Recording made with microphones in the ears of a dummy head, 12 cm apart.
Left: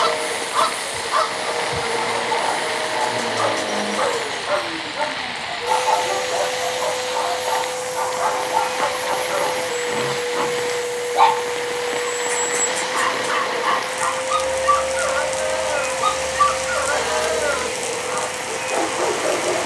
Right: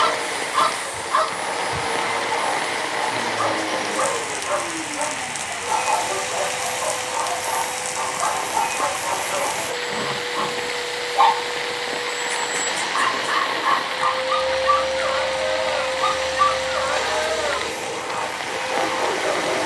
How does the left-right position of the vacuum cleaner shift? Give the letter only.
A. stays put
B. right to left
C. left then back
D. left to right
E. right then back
A.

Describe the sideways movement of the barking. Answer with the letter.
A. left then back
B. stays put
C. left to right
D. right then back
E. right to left
B.